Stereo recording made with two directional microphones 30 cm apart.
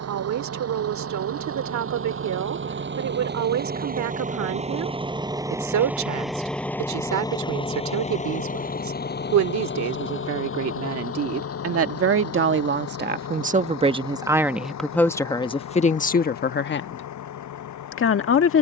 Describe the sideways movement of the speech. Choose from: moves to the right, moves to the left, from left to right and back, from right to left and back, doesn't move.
moves to the left.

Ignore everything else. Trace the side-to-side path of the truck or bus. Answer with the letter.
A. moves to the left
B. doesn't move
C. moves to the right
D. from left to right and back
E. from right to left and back
A.